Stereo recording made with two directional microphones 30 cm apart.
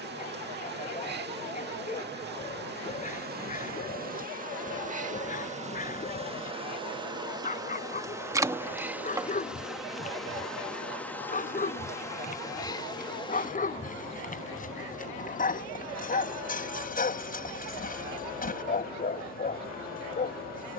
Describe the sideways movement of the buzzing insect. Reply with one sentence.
In this clip you hear the buzzing insect travel towards the left.